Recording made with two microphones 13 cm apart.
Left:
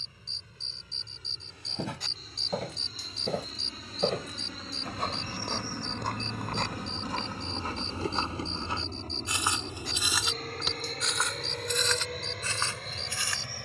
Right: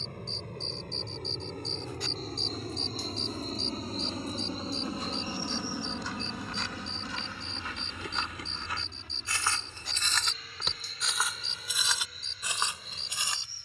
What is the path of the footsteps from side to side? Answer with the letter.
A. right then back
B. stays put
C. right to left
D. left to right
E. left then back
D.